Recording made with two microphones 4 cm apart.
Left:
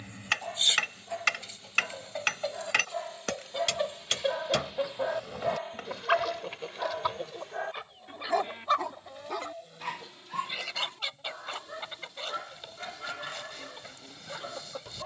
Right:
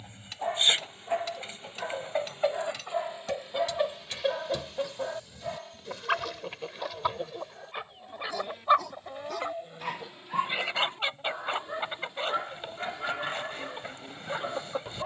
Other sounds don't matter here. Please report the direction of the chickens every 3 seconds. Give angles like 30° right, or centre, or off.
30° right, centre, 10° right, 30° right, 30° right.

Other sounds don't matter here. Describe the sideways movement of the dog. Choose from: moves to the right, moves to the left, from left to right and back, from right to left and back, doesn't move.
from right to left and back.